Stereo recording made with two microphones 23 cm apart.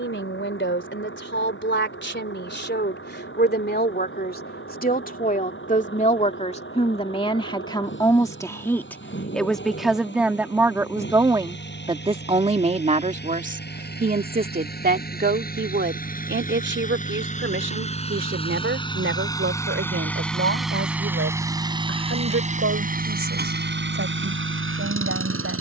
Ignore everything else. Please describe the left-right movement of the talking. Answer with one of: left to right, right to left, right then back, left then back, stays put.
left to right.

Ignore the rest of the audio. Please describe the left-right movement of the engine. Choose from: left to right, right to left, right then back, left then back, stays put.
left to right.